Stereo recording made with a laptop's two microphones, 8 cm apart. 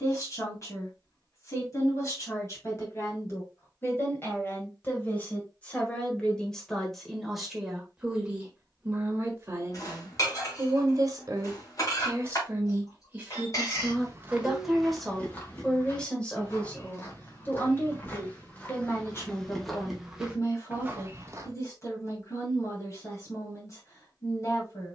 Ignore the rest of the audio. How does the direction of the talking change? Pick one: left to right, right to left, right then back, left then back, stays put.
right then back.